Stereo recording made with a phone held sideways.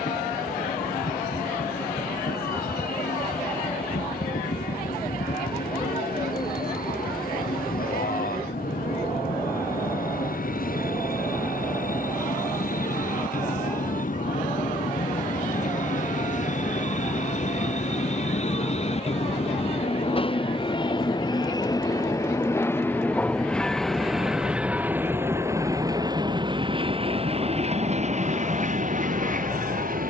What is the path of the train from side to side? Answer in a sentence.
You can hear the train go from the left side to the right.